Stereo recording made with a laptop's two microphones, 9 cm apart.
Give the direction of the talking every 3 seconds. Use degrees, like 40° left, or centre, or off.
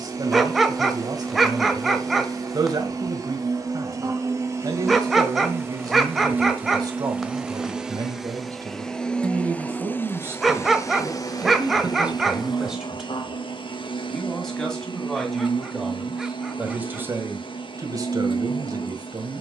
50° right, 50° right, 40° right, 30° right, centre, 10° right, 40° right.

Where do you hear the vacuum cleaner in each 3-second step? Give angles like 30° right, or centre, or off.
40° right, 30° right, 10° right, 30° left, 60° left, 60° left, 60° left.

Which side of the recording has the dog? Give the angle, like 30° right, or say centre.
centre.